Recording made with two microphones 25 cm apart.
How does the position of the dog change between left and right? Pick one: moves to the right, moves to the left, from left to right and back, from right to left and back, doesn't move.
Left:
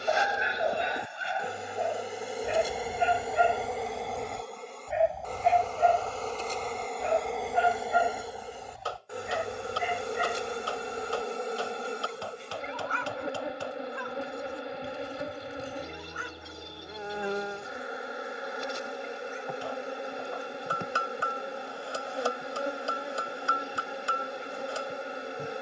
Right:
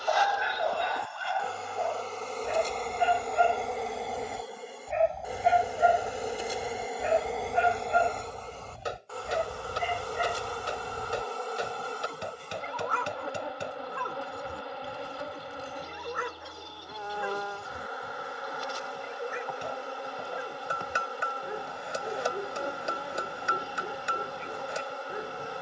moves to the right.